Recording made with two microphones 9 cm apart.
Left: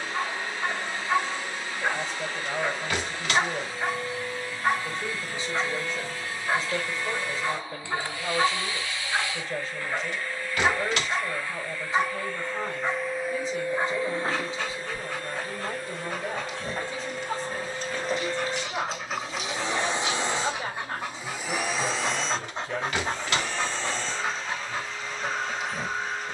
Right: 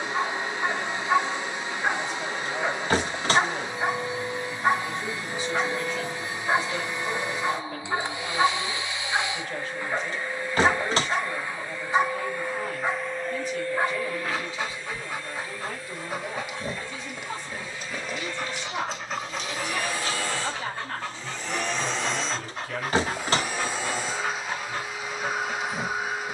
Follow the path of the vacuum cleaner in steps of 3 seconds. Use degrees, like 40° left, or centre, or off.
20° right, 20° right, 20° right, 20° right, 10° left, 60° left, 30° left, centre, 10° right.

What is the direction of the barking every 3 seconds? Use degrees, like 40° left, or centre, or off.
10° right, 10° right, 10° right, 10° right, 10° right, 10° right, 10° left, 20° left, centre.